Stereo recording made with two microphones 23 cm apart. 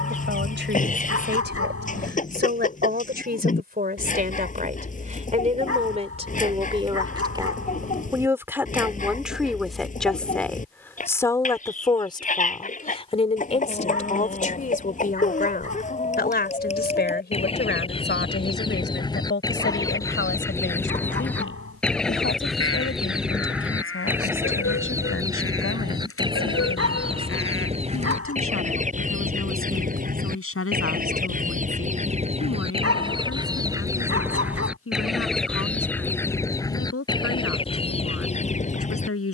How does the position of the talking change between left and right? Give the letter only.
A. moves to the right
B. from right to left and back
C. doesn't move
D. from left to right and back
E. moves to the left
E.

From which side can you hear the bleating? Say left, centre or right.
left.